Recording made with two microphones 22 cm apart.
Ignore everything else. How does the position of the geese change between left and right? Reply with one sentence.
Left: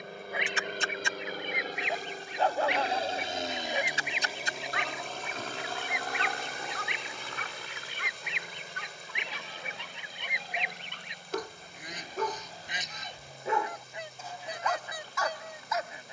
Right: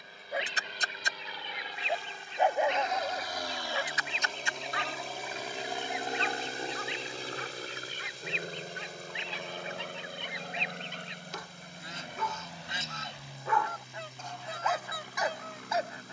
You can hear the geese stay put.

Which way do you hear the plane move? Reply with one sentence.
You can hear the plane move from left to right.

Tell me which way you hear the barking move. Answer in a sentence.
In this clip you hear the barking go left and come back.